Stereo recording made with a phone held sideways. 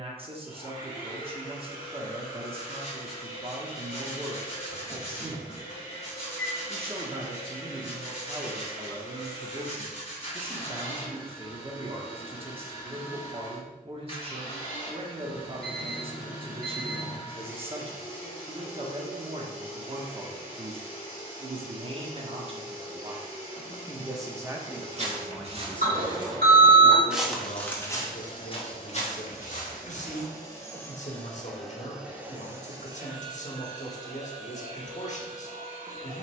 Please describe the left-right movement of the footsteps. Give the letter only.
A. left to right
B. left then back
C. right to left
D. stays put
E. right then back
C.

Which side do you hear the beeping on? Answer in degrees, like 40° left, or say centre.
80° right.